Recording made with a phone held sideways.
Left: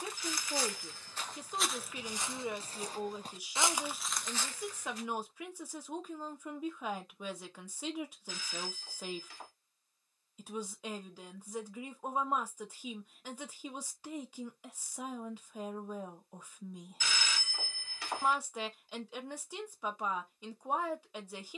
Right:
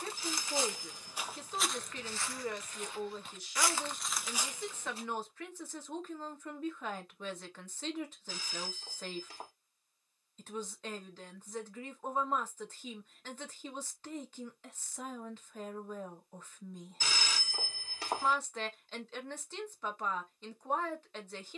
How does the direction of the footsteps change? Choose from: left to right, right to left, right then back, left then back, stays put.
left then back.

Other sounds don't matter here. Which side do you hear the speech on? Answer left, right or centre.
centre.